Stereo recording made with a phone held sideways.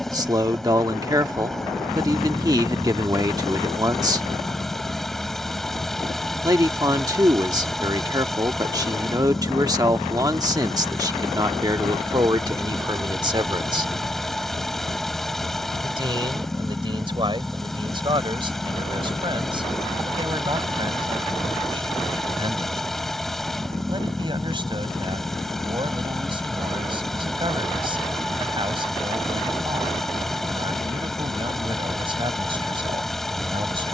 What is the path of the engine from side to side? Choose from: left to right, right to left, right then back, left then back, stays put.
stays put.